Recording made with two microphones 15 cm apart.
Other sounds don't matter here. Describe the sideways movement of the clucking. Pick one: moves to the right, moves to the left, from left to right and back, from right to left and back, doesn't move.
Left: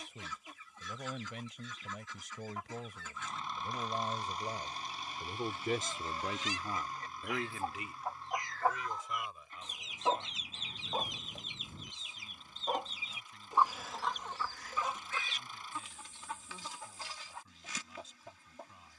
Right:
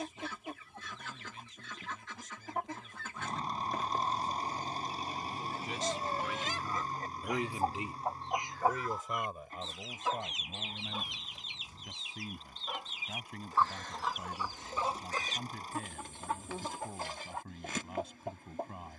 from right to left and back.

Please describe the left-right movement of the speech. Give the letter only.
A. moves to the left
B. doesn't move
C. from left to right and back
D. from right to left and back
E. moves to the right
E.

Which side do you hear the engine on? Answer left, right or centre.
right.